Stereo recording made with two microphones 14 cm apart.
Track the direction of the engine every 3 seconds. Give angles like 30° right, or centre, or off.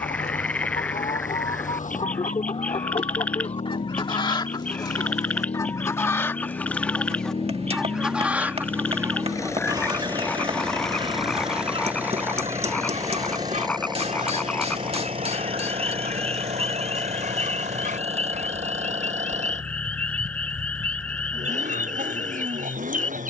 70° left, 60° left, 40° left, 10° left, 30° right, 50° right, 60° right, 60° right.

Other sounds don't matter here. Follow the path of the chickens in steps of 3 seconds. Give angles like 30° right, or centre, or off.
50° left, 30° left, centre, 40° right, 60° right, 70° right, 80° right, 80° right.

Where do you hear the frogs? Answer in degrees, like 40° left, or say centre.
10° left.